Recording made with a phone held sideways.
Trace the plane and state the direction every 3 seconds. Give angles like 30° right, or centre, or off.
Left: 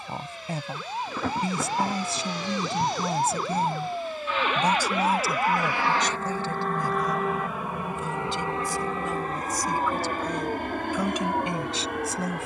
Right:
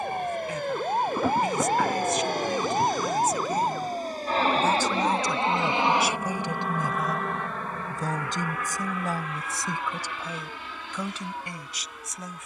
60° right, 40° right, 10° left, 50° left.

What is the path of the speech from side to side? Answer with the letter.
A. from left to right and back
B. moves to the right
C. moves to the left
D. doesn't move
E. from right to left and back
A.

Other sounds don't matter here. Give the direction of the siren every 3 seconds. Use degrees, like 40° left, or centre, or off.
30° right, 10° left, 30° left, 50° left.